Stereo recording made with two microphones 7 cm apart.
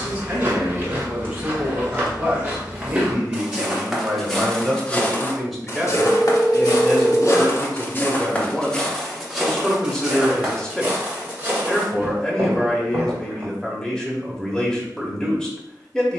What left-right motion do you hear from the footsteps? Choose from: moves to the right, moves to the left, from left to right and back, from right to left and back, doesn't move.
from right to left and back.